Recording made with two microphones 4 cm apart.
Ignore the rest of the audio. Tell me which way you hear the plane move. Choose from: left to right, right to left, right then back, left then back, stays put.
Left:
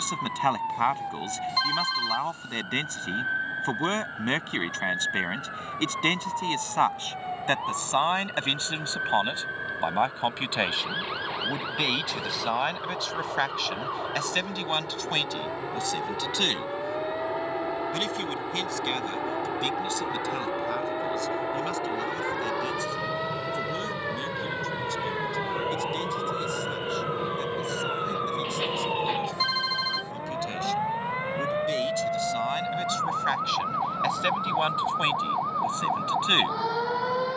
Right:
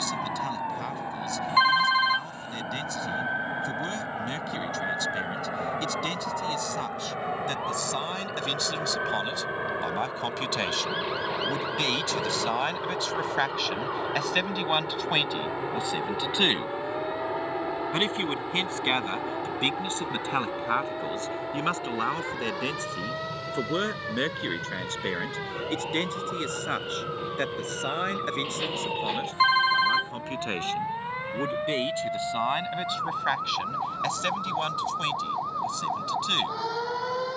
right to left.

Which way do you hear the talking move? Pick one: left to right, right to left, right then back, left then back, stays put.
right then back.